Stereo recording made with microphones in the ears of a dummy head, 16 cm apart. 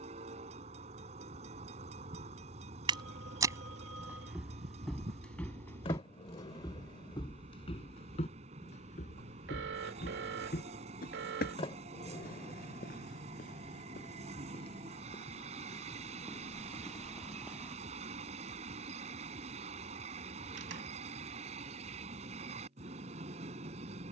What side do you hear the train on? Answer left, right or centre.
right.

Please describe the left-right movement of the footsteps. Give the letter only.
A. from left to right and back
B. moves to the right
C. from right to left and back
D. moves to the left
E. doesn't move
C.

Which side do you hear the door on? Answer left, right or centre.
left.